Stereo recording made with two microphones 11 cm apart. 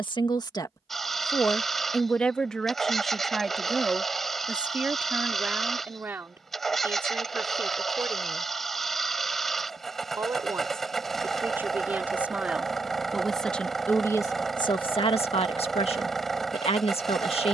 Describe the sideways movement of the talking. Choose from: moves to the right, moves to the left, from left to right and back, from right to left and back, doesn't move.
from left to right and back.